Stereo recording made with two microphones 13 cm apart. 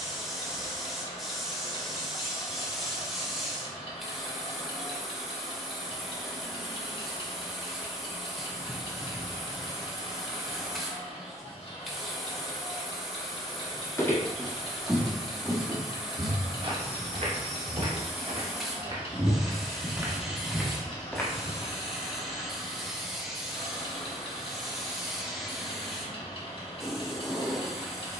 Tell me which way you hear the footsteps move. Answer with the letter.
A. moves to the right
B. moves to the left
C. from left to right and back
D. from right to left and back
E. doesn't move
C.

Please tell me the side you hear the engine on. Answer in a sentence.
In this clip you hear the engine on the left.